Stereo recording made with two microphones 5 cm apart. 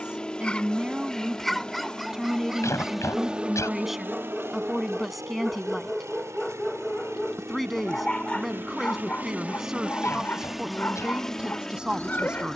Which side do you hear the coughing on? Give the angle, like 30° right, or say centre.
80° left.